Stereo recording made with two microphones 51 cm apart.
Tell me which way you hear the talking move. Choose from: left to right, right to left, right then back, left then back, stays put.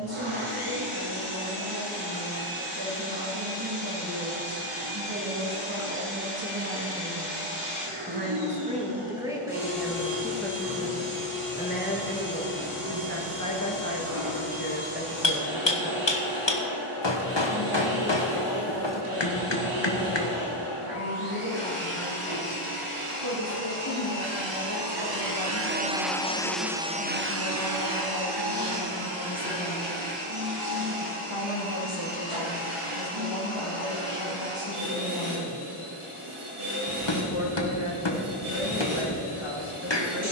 right to left.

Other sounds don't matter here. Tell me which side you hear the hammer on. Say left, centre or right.
left.